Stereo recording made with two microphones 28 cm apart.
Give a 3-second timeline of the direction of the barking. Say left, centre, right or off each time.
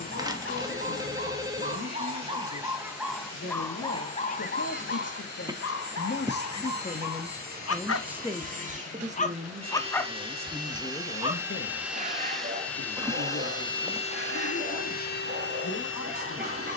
right, left, left, centre, right, right.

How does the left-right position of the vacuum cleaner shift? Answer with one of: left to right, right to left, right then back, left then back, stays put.
right to left.